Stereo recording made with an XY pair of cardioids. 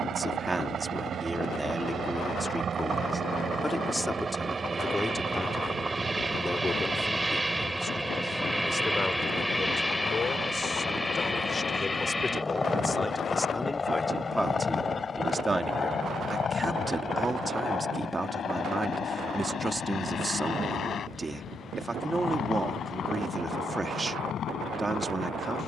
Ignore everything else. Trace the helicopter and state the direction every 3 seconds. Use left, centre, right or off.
right, right, centre, centre, left, left, left, left, left.